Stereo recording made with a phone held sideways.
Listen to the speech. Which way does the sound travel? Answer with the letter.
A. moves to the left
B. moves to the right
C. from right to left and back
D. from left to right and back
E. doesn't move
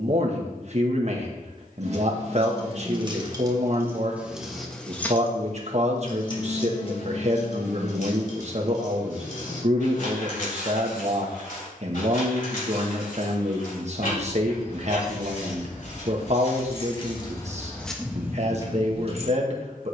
E.